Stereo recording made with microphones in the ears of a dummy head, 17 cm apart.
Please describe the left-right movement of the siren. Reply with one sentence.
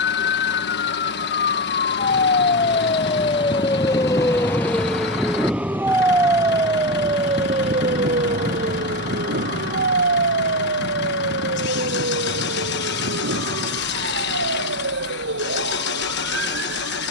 You can hear the siren go from the left side to the right.